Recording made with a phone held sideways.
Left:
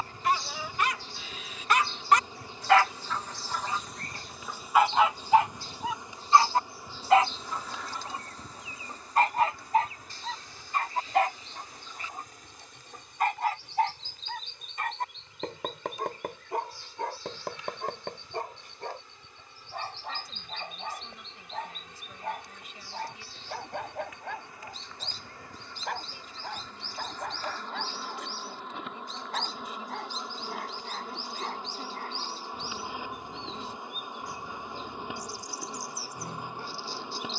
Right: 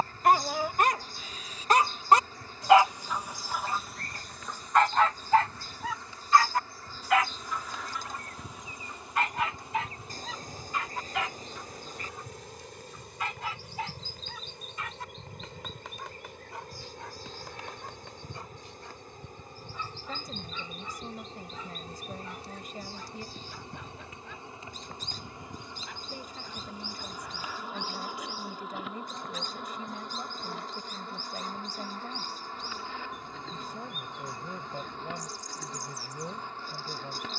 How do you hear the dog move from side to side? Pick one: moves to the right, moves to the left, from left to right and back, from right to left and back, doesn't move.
moves to the left.